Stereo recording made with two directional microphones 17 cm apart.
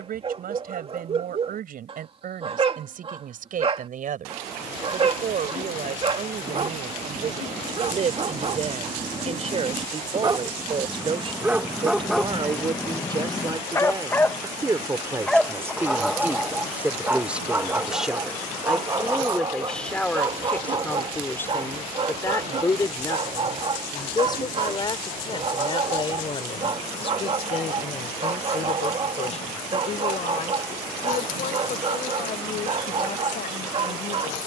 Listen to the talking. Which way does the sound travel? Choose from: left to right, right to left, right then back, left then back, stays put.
right to left.